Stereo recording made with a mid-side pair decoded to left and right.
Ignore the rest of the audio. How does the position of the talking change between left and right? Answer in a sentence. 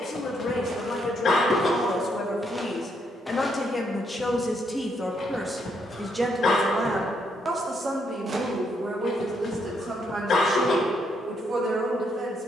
You can hear the talking move to the right.